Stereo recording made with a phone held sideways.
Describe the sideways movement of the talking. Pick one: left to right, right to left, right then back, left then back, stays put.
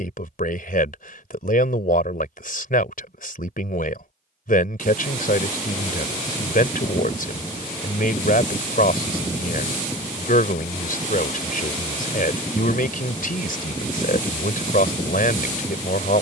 stays put.